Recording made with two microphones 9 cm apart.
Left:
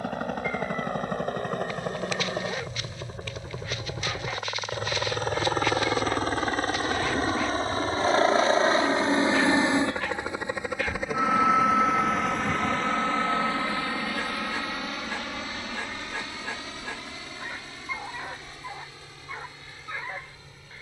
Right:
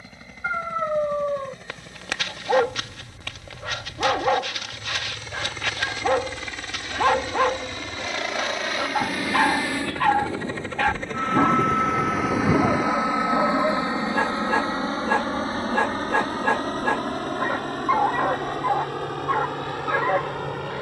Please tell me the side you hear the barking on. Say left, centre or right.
right.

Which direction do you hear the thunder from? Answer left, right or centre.
right.